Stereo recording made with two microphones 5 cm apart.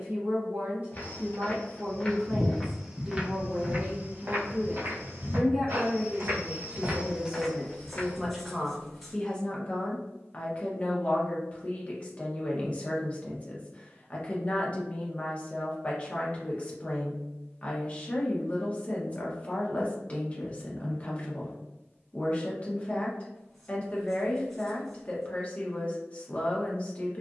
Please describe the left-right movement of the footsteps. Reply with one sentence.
You can hear the footsteps move from left to right and back again.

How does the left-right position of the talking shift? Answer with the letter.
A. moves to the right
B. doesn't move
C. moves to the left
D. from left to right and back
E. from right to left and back
C.